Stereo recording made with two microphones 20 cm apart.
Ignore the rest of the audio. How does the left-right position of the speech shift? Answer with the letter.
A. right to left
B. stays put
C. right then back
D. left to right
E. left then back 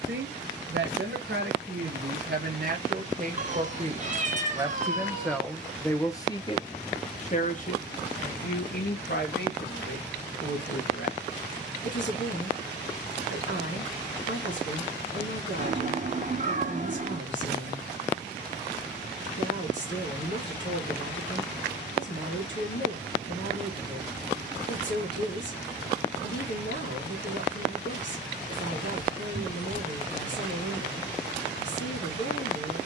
A.